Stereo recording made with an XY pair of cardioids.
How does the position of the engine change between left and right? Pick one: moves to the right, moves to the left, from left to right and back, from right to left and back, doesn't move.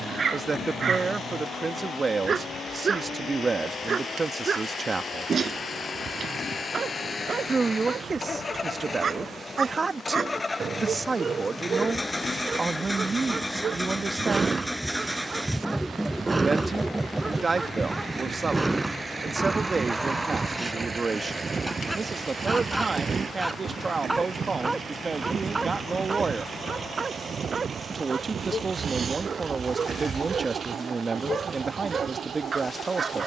moves to the right.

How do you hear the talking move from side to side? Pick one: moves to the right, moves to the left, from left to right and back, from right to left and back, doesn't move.
doesn't move.